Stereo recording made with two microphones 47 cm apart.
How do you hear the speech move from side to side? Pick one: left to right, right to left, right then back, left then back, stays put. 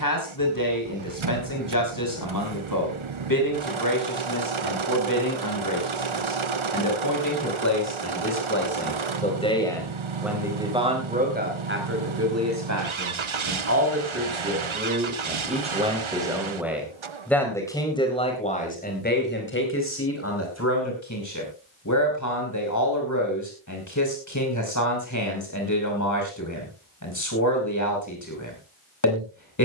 right then back.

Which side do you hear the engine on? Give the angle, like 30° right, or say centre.
70° right.